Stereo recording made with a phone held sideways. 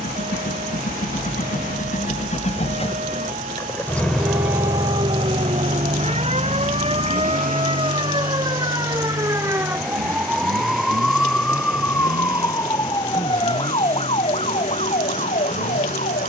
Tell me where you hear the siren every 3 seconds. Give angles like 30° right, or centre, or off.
60° right, 50° right, 40° right, centre, 30° left, 50° left.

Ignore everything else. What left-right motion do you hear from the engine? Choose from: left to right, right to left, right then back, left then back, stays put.
left to right.